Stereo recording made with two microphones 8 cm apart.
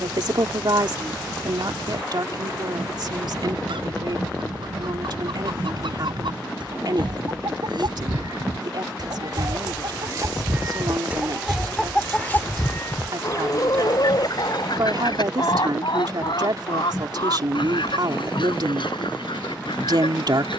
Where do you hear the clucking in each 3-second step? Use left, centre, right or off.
right, right, right, right, left, left, left.